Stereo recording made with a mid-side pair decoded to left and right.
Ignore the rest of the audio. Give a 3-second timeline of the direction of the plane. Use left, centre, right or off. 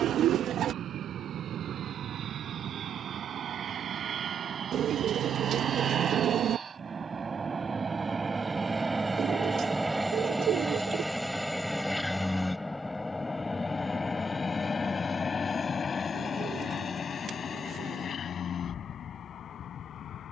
right, right, right, centre, left, left, left.